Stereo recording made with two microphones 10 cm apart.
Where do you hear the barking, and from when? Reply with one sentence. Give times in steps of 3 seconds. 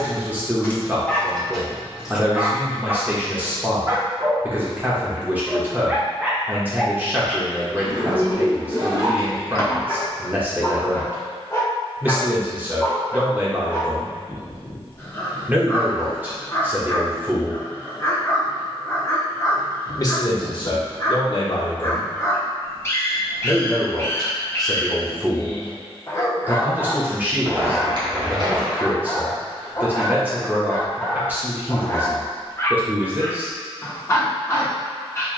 In this clip you hear the barking in the centre from 0 s, on the right from 3 s, in the centre from 6 s and on the left from 9 s.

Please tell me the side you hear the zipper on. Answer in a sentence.
You can hear the zipper on the right.